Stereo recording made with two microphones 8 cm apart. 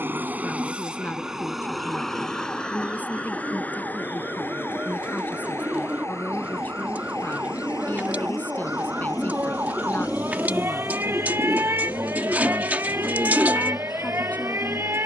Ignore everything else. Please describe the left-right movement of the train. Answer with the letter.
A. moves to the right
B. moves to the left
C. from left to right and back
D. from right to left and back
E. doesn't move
B.